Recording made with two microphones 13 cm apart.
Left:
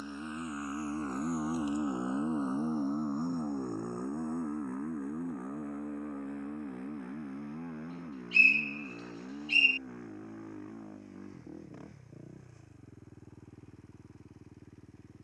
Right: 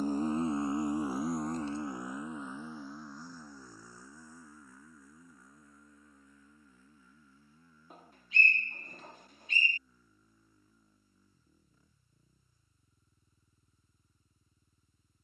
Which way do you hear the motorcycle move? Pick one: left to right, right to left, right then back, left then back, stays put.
right to left.